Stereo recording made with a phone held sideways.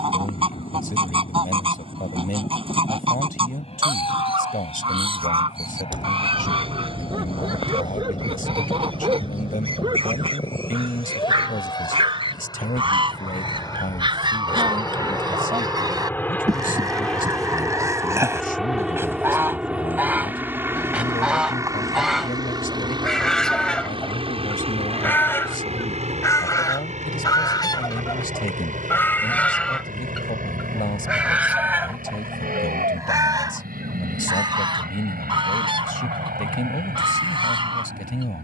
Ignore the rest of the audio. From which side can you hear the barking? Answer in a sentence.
In this clip you hear the barking on the right.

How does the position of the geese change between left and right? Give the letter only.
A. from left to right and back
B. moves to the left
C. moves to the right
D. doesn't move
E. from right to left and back
E.